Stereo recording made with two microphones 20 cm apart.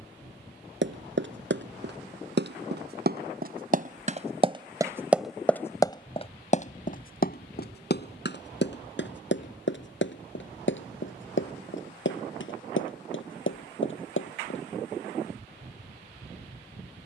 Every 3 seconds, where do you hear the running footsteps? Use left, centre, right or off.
right, right, left, left, left, off.